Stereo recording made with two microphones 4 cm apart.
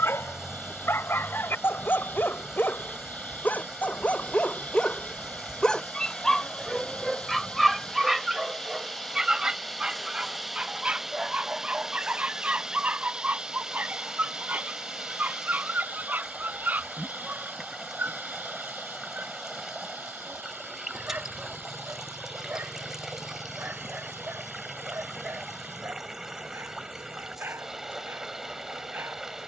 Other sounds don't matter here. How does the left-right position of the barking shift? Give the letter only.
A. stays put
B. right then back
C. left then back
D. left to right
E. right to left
D.